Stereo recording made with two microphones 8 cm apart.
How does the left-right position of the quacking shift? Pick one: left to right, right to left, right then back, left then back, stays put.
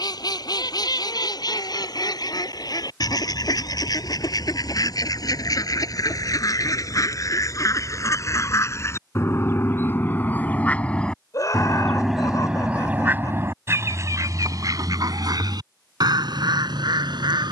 left to right.